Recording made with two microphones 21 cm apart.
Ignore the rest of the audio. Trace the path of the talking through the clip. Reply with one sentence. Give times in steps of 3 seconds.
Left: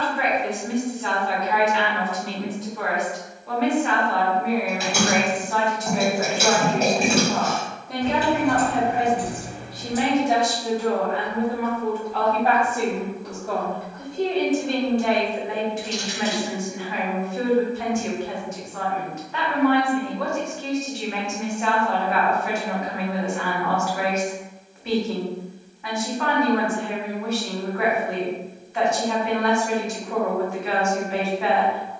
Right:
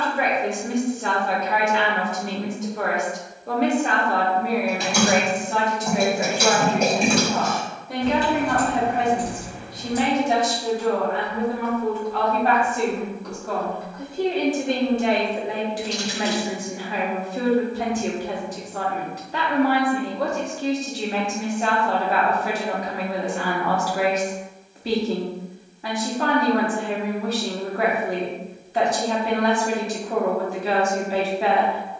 You can hear the talking on the right from 0 s, in the centre from 6 s and on the right from 15 s.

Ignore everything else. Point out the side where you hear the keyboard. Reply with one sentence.
In this clip you hear the keyboard in the centre.